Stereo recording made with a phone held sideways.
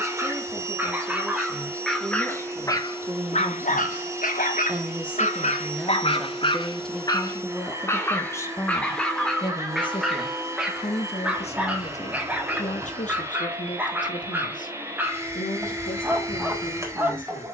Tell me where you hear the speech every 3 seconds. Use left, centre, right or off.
right, centre, centre, left, left, left.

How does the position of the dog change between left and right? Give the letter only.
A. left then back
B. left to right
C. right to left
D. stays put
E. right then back
A.